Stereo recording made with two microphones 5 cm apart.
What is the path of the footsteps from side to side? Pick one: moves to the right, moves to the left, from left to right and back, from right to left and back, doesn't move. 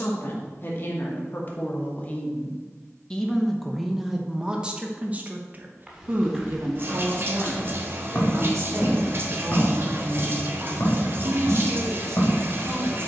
moves to the left.